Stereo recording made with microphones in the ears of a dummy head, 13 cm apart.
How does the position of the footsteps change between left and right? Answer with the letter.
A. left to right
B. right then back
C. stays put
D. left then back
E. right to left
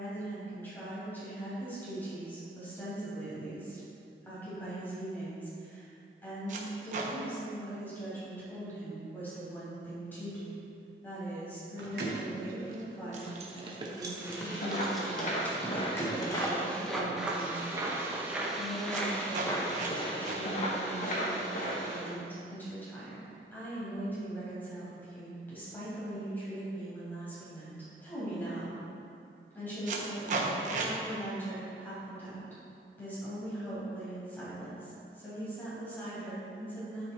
B.